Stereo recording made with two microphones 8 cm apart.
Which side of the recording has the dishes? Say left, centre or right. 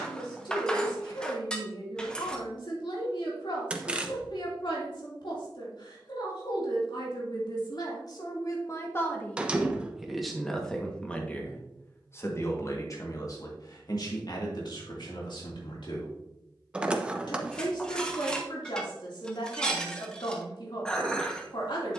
centre.